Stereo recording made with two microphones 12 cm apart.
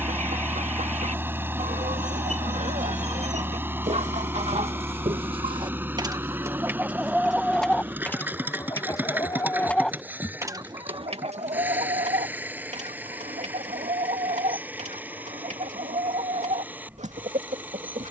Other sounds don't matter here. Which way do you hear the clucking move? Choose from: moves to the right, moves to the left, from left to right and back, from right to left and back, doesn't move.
from right to left and back.